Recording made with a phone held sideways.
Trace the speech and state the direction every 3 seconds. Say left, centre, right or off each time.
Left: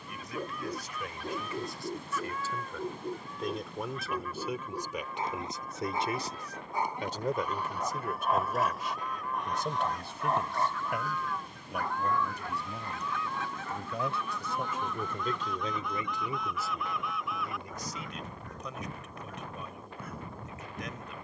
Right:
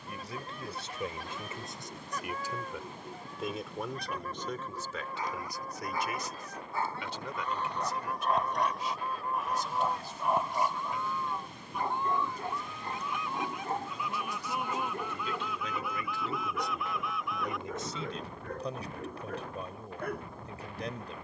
right, centre, left, left, left, centre, right.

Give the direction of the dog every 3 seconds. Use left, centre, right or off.
left, left, centre, centre, right, right, right.